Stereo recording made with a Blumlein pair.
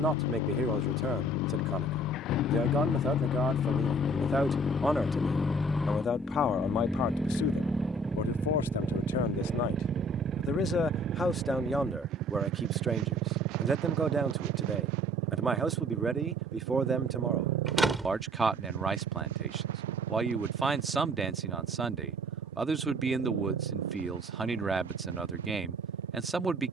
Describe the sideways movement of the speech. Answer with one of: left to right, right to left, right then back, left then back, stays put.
left then back.